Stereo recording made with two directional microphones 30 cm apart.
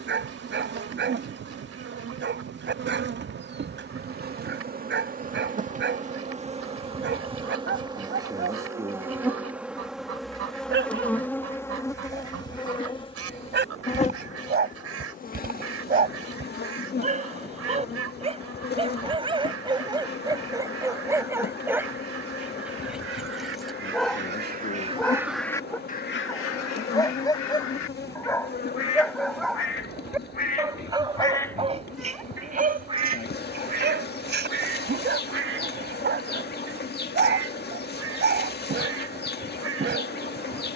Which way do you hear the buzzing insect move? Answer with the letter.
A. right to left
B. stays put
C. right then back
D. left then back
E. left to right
A.